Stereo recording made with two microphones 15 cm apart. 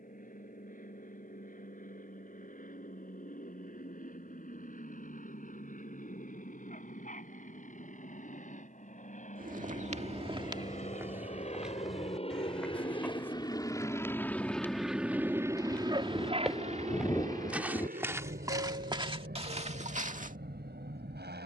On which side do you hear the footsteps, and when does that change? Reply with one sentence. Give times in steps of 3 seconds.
You can hear the footsteps not at all from 0 s, on the right from 9 s, in the centre from 12 s and on the right from 18 s.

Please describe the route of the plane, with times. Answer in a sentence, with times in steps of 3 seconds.
In this clip you hear the plane on the left from 0 s and on the right from 15 s.